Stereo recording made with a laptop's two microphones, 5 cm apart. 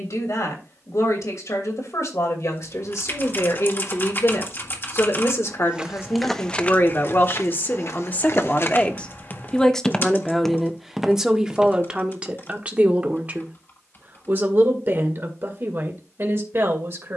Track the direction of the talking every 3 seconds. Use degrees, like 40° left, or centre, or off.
70° left, 60° left, 40° left, 10° right, 30° right, 50° right.